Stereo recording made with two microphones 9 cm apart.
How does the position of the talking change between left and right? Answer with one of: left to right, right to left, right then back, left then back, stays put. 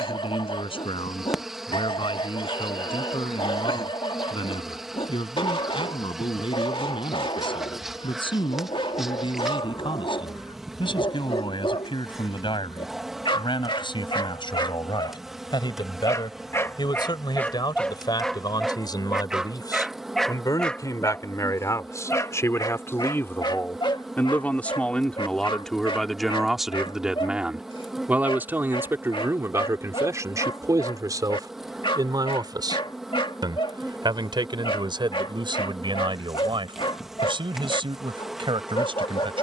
left to right.